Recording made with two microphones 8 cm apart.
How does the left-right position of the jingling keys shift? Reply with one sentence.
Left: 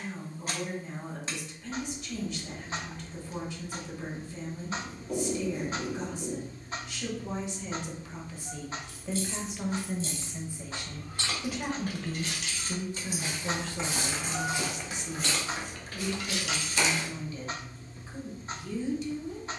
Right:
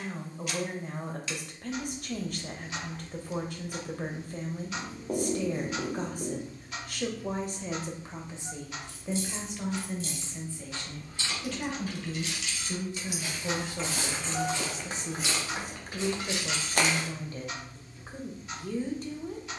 In this clip you hear the jingling keys move from right to left and back again.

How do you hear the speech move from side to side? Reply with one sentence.
In this clip you hear the speech move from right to left and back again.